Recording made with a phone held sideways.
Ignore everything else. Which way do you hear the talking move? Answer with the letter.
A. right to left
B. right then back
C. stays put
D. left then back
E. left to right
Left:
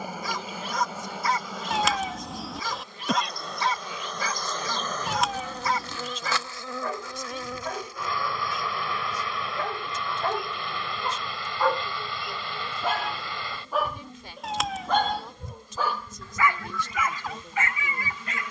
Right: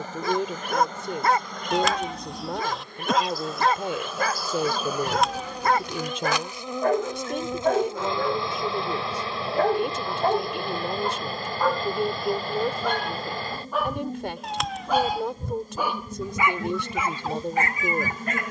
C.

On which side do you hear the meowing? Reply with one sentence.
You can hear the meowing in the centre.